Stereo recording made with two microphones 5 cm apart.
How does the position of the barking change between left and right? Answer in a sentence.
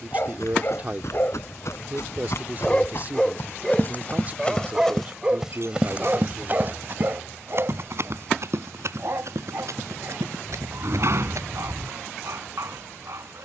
In this clip you hear the barking travel towards the right.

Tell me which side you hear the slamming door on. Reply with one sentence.
In this clip you hear the slamming door on the right.